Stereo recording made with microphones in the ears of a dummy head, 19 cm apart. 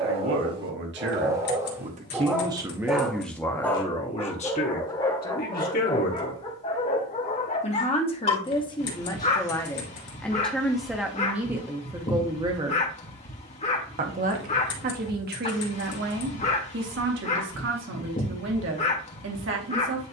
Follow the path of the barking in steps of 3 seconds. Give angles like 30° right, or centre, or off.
20° right, 20° left, 30° left, 30° left, 30° left, 30° left, 30° left.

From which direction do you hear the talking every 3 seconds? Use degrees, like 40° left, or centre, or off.
40° right, 30° left, 30° left, centre, 30° right, 50° right, 60° right.